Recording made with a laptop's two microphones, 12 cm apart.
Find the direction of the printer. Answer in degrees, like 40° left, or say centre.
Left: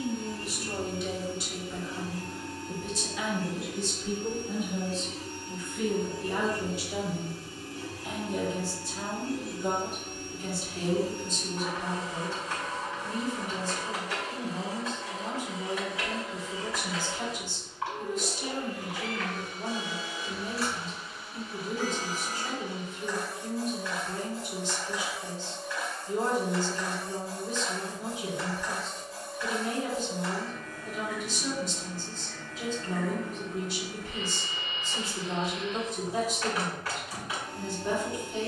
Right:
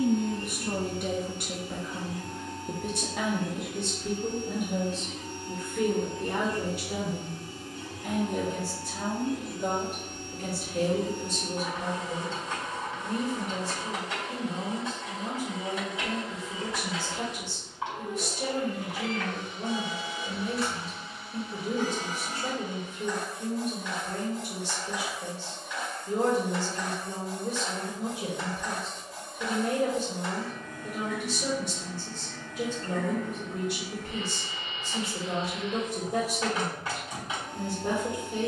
20° right.